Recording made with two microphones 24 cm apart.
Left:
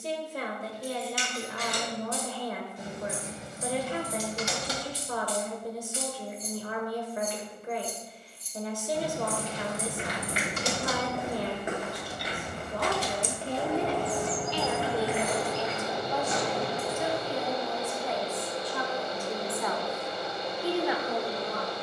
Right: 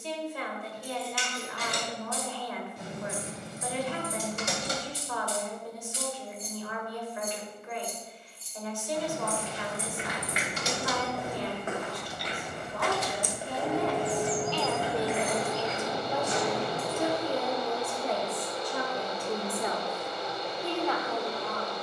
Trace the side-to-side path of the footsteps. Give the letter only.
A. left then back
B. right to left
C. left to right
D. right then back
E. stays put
C.